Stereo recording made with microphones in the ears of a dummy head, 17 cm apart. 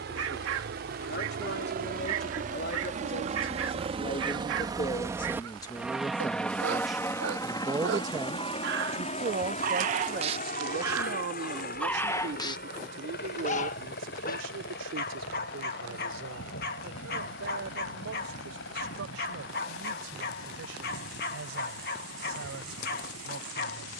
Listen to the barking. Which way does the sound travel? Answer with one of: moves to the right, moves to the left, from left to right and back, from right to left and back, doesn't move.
moves to the left.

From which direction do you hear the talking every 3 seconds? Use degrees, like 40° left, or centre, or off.
60° left, 30° left, 10° right, 50° right, 60° right, 70° right, 80° right, 80° right.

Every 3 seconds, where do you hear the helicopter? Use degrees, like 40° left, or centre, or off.
60° right, 20° right, 20° left, 40° left, 60° left, 60° left, 70° left, 70° left.